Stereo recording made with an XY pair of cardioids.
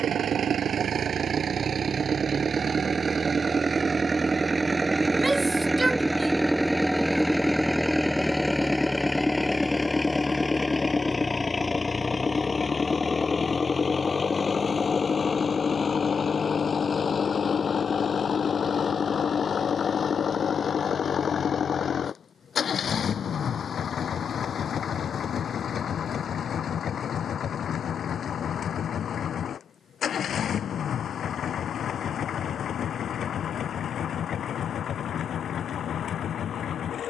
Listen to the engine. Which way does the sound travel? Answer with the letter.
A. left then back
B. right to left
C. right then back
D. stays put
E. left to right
B.